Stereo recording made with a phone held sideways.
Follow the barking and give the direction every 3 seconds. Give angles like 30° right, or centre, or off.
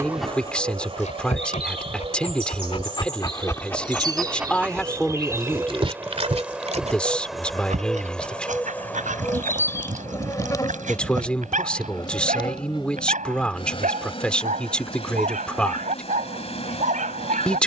40° left, 10° right, 60° right, 70° right, 70° right, 70° right.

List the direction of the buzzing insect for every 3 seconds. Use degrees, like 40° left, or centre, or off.
40° right, 30° right, centre, 20° left, 40° left, 50° left.